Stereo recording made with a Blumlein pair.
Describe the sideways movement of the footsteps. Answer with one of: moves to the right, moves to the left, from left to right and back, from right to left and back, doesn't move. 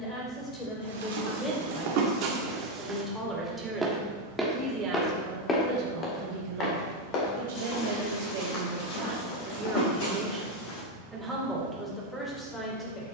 moves to the left.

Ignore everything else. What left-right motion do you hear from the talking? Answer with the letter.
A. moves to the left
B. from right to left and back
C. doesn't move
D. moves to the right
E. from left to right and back
E.